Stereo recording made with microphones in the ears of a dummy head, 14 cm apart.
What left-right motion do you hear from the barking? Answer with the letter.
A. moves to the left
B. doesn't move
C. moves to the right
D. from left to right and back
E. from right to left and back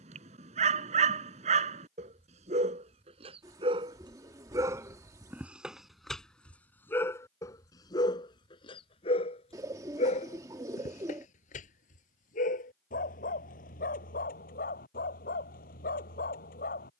A.